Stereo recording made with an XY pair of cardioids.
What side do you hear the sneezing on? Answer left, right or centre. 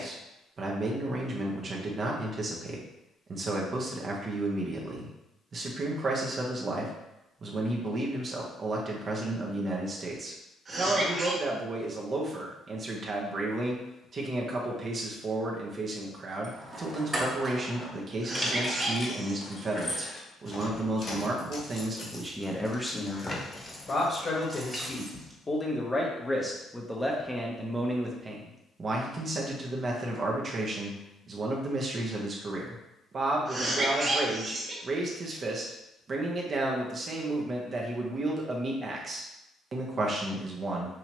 right.